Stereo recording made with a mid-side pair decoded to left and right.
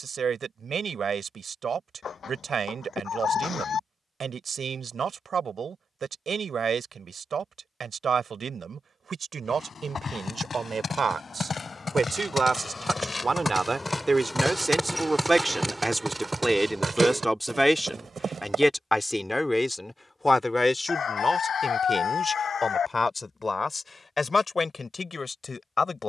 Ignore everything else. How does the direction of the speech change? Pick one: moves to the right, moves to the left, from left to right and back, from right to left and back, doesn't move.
moves to the left.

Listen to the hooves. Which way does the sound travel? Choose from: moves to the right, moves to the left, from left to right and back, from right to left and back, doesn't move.
moves to the right.